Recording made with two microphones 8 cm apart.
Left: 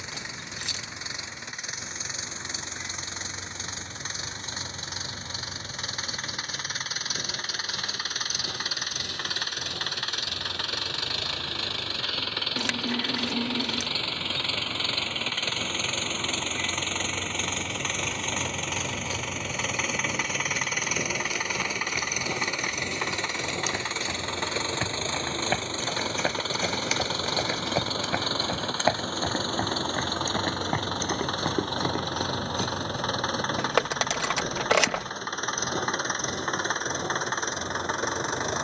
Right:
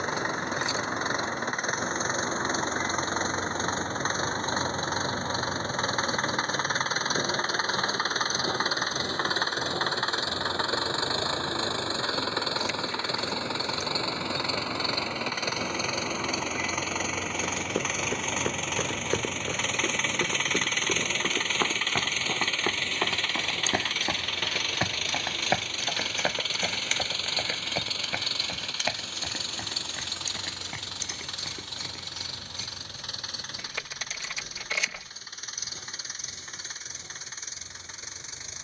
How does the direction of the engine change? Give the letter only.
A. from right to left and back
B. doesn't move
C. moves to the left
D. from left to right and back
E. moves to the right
C.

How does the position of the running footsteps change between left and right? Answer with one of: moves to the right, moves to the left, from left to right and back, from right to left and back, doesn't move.
moves to the left.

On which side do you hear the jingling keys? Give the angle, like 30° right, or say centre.
70° left.